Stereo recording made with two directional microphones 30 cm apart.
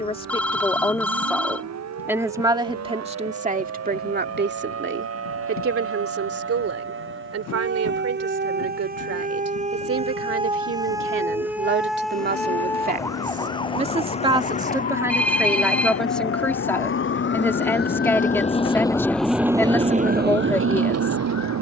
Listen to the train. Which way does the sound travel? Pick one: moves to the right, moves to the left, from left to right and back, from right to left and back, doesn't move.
moves to the right.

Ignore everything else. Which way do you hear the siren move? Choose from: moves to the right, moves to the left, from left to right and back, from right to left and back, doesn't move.
moves to the left.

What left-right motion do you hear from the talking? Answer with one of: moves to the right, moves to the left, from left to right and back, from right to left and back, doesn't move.
from left to right and back.